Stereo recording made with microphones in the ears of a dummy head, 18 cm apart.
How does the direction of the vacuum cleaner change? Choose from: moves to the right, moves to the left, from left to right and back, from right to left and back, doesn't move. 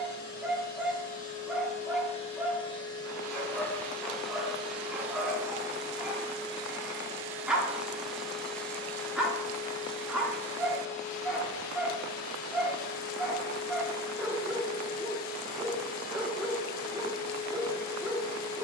from left to right and back.